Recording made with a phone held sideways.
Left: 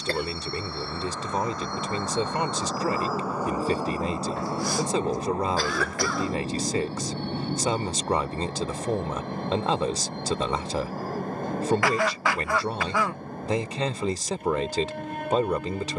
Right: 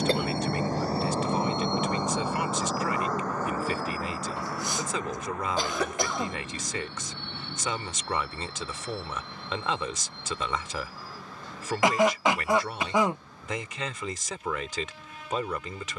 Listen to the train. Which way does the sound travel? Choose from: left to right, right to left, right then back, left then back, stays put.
right to left.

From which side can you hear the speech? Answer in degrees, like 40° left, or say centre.
30° left.